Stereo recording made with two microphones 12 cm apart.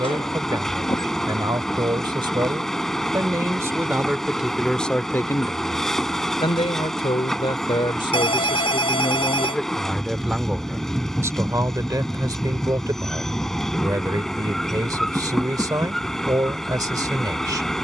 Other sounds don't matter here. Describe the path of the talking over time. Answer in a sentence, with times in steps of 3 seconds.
In this clip you hear the talking on the right from 0 s, in the centre from 3 s, on the left from 6 s, in the centre from 9 s and on the right from 12 s.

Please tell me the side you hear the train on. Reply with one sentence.
You can hear the train in the centre.